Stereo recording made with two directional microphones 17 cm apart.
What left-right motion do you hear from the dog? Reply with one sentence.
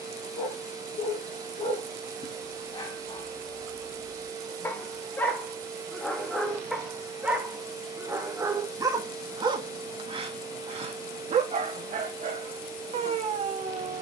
In this clip you hear the dog move to the right.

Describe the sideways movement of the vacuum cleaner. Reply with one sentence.
You can hear the vacuum cleaner stay put.